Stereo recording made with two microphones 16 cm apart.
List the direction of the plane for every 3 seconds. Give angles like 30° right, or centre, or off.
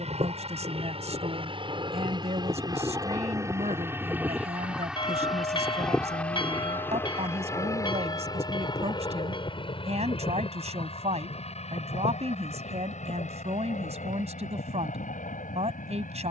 40° right, 10° right, 20° left, 40° left, 50° left, 50° left.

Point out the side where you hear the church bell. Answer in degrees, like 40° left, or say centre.
30° left.